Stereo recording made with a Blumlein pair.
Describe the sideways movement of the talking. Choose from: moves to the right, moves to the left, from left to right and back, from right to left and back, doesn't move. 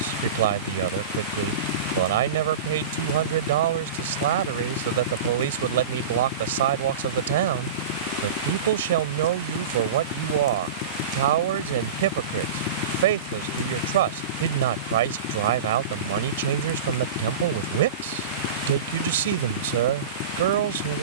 doesn't move.